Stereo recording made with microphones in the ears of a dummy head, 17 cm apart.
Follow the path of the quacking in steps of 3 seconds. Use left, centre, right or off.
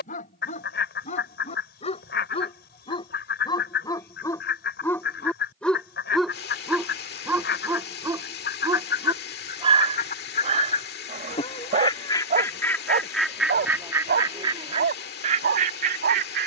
left, left, left, left, centre, right.